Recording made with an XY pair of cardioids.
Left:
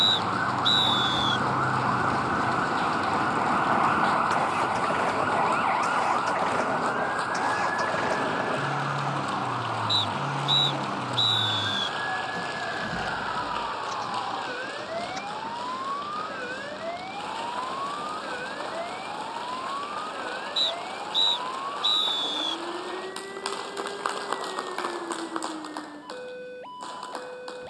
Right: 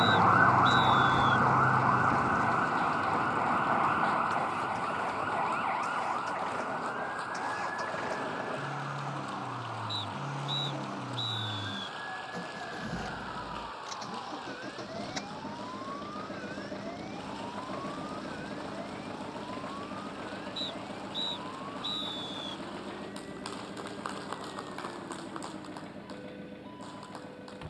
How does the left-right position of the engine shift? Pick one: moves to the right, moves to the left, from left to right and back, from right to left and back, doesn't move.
moves to the right.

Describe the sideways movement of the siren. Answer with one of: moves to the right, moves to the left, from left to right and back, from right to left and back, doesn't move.
moves to the left.